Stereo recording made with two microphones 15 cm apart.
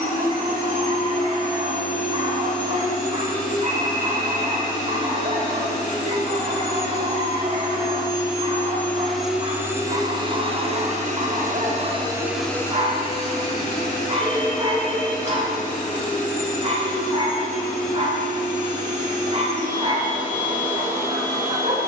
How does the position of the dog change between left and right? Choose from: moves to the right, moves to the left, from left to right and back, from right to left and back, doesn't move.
doesn't move.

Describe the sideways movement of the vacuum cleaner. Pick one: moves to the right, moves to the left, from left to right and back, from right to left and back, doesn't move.
from left to right and back.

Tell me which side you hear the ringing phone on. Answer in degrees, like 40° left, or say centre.
10° left.